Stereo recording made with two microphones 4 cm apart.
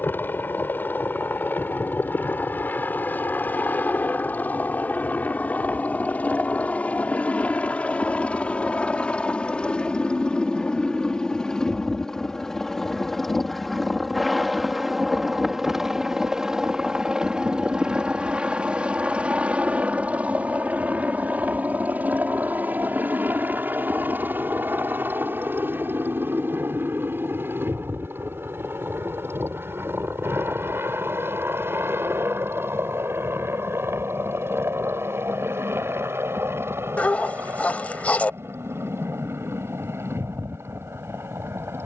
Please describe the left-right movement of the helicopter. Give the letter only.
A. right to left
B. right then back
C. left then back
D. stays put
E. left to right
E.